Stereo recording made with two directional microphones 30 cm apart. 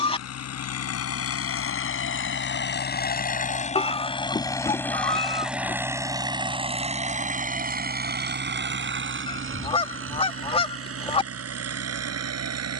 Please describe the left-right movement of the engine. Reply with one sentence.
You can hear the engine go from the left side to the right.